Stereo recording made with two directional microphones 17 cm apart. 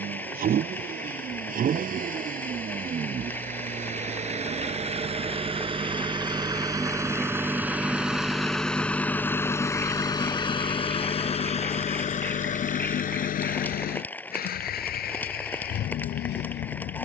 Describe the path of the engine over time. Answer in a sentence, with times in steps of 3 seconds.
In this clip you hear the engine on the right from 0 s, in the centre from 6 s and on the left from 9 s.